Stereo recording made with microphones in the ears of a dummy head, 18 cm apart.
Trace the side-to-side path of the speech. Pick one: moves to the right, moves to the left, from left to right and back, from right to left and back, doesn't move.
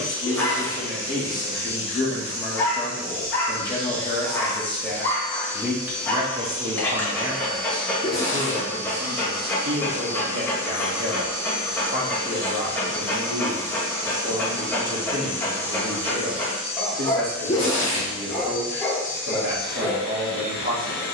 moves to the right.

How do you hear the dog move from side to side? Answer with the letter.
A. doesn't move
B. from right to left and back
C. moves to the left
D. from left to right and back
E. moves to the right
A.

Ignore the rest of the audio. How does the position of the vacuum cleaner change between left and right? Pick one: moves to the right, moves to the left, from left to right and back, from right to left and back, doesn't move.
moves to the left.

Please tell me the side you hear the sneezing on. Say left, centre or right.
left.